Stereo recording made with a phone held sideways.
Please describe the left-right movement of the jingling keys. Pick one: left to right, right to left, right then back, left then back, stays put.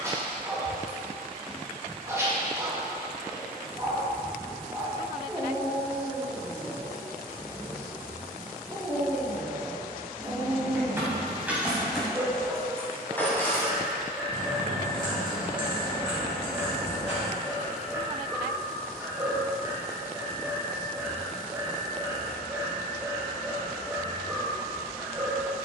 right to left.